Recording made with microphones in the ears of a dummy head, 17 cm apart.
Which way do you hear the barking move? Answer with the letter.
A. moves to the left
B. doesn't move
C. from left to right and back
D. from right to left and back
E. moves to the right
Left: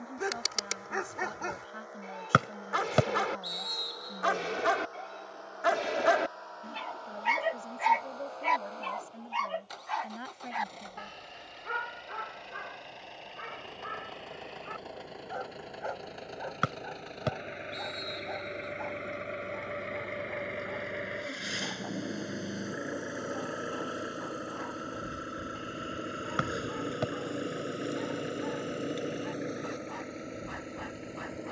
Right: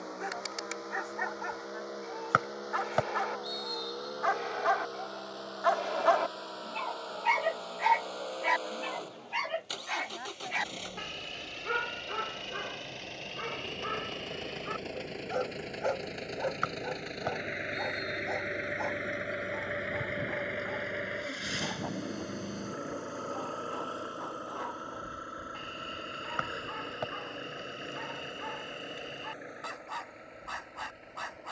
E.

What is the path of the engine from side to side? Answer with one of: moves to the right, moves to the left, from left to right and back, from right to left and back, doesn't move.
moves to the left.